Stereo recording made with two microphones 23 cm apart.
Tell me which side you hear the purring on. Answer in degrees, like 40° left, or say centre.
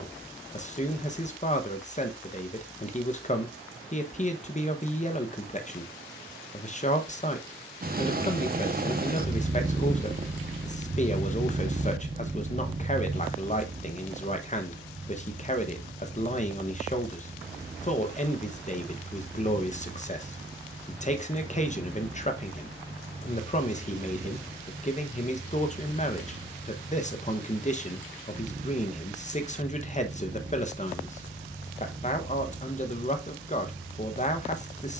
40° right.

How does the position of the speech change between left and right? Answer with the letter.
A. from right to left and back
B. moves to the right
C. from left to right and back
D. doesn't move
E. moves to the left
D.